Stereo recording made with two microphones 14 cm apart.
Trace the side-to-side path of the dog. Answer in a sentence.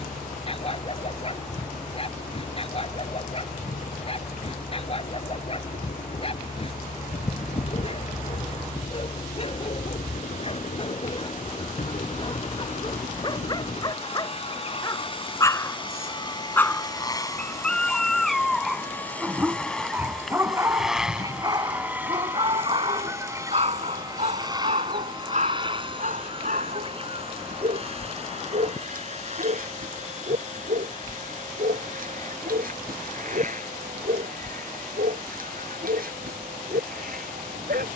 In this clip you hear the dog move from left to right.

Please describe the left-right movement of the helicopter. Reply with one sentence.
In this clip you hear the helicopter move to the right.